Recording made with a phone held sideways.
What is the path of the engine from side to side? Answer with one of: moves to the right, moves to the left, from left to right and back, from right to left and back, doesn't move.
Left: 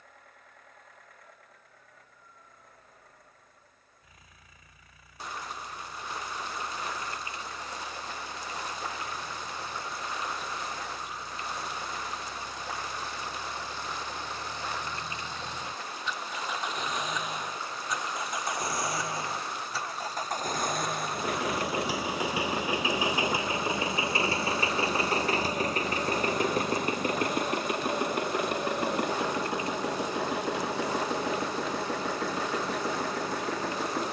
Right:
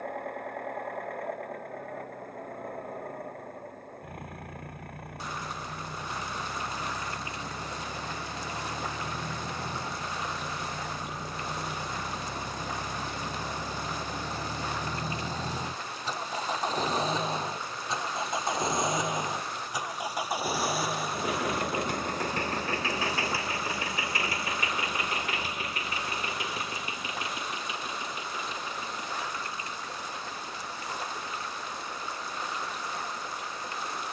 moves to the left.